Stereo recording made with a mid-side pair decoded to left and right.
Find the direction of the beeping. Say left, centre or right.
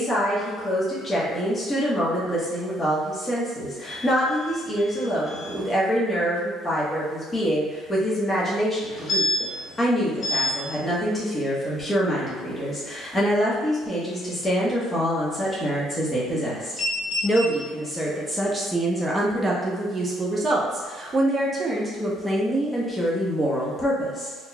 left.